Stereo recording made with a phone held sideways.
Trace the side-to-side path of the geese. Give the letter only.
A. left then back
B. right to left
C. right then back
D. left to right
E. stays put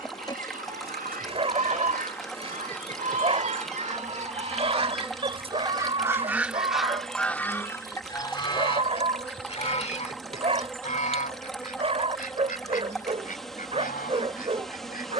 B.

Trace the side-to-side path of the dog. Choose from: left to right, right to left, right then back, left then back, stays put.
stays put.